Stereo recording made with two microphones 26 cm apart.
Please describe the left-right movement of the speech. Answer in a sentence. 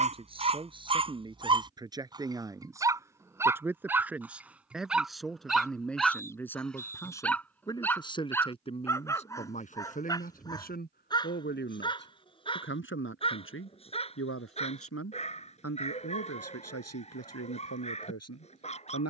In this clip you hear the speech travel towards the left.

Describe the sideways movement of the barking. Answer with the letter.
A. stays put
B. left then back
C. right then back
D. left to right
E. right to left
E.